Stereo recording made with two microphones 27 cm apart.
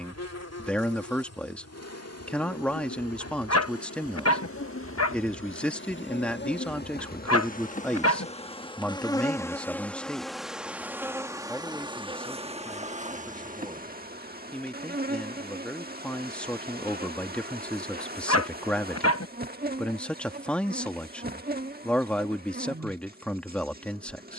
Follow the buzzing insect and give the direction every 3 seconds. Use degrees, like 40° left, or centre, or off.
70° left, 50° left, 30° left, centre, 30° right, 30° right, 30° right, 30° right.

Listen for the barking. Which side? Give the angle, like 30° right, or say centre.
60° left.